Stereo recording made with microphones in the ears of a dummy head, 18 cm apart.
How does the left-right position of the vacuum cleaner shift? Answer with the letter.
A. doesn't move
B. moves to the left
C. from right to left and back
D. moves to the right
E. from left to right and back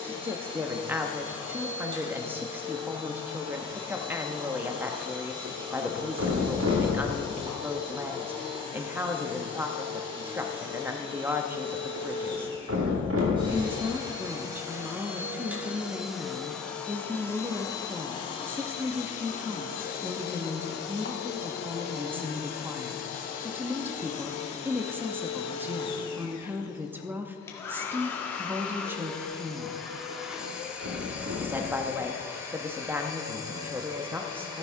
C.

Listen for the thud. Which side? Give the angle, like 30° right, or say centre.
70° right.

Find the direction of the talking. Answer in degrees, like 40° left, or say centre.
10° right.